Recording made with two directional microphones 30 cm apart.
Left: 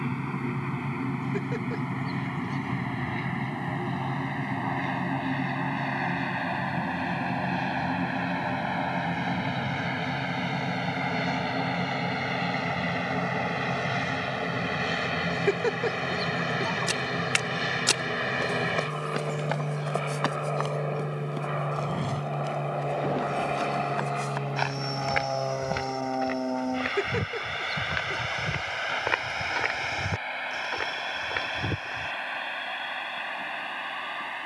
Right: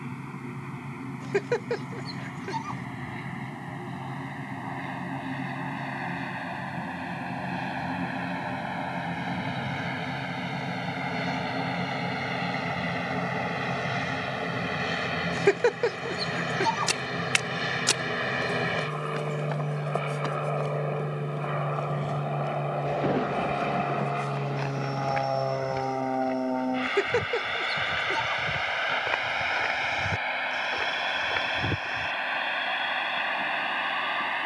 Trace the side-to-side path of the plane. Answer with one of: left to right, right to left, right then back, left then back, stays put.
left to right.